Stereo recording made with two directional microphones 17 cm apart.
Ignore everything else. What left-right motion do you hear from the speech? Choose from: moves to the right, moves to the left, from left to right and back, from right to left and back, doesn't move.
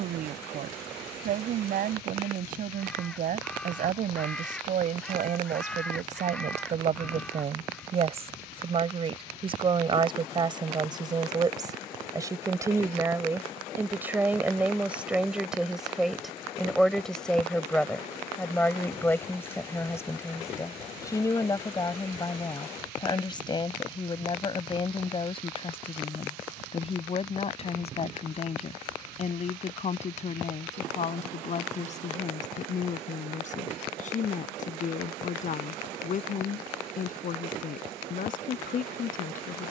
moves to the left.